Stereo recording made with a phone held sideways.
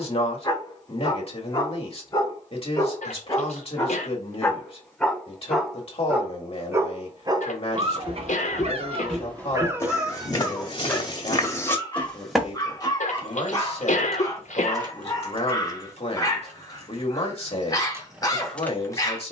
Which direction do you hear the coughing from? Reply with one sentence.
You can hear the coughing on the left.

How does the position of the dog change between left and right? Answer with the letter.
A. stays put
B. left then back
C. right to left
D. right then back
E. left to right
D.